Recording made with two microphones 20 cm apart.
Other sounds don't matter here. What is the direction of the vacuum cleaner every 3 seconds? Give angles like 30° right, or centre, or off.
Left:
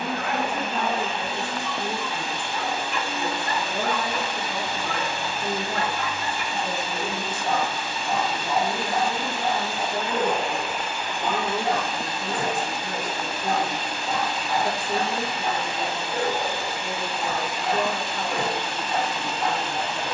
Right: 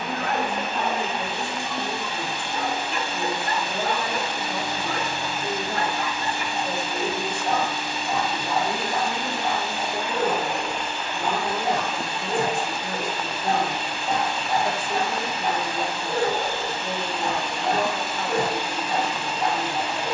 20° right, 20° right, 20° right, centre, 40° left, 20° left, 10° right.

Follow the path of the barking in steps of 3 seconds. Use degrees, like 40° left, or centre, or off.
30° right, 30° right, centre, centre, 30° right, 30° right, 30° right.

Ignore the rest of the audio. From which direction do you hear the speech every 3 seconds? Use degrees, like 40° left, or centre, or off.
40° left, 40° left, centre, 30° left, 40° left, 40° left, 40° left.